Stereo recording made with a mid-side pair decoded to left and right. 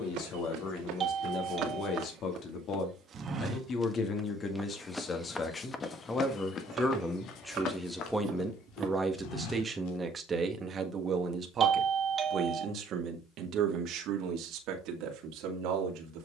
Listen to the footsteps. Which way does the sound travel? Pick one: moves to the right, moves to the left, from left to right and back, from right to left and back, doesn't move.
moves to the left.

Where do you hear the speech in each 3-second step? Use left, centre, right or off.
left, left, centre, right, right, right.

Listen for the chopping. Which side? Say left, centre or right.
right.